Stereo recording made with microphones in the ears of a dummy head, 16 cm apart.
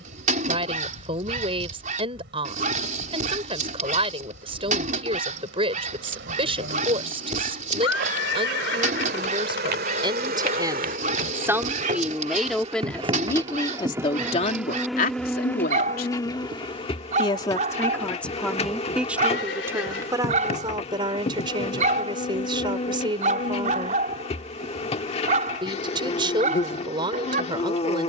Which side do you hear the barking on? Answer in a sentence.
You can hear the barking on the right.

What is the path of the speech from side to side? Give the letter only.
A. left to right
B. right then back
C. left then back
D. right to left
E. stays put
C.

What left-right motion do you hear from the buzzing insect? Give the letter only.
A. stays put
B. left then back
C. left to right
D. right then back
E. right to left
E.